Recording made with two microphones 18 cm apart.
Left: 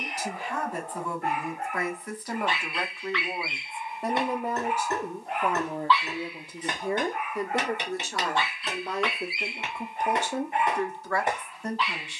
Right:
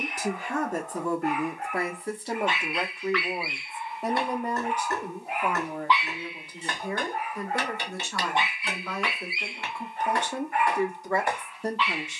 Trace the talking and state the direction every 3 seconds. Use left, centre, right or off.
right, centre, left, centre.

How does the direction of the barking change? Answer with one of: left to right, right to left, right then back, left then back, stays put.
right then back.